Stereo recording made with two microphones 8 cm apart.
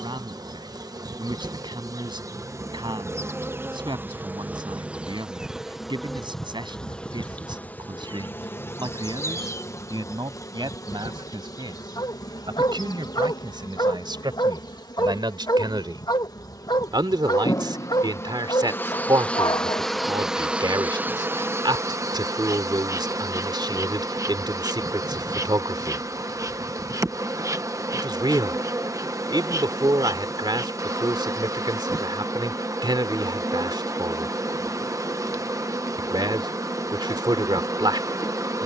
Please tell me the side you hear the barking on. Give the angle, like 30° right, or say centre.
60° left.